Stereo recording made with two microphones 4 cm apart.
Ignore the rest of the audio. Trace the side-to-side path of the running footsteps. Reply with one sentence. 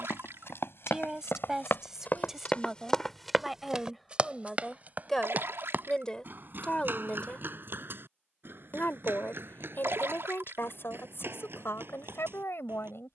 You can hear the running footsteps go from the left side to the right.